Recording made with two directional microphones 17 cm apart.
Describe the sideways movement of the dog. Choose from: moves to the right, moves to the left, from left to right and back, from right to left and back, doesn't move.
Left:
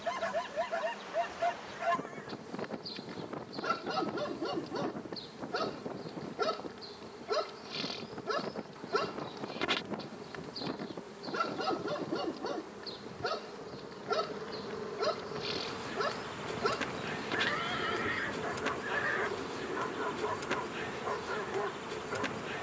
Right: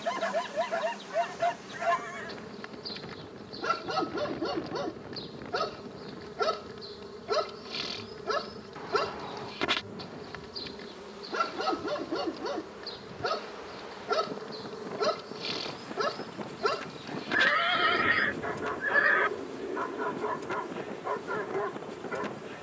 doesn't move.